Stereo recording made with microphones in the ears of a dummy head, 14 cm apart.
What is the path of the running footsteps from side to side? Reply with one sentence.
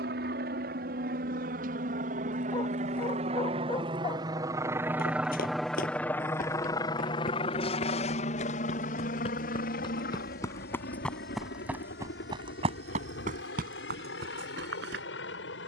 In this clip you hear the running footsteps go from the left side to the right.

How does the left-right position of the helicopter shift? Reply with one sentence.
You can hear the helicopter go from the right side to the left.